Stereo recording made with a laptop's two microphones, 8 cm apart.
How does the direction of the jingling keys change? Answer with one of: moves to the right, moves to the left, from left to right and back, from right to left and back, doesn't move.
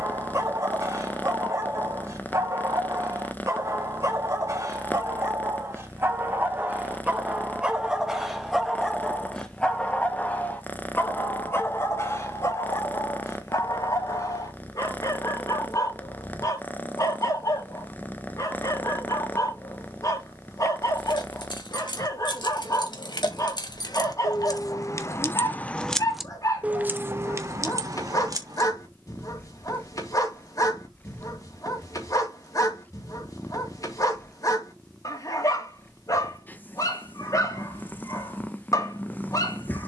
moves to the right.